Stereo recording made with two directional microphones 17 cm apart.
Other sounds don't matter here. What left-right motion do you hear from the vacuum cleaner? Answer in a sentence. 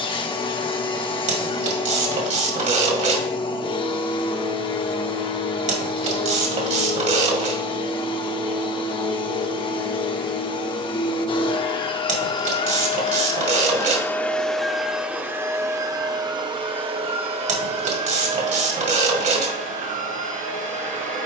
In this clip you hear the vacuum cleaner go from the left side to the right.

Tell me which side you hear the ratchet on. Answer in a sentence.
You can hear the ratchet on the right.